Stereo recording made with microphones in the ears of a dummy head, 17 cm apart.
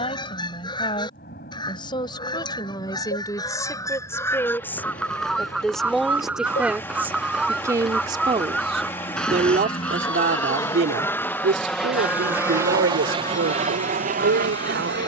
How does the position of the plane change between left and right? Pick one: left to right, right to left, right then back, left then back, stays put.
left to right.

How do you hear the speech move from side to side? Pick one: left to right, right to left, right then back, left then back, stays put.
left to right.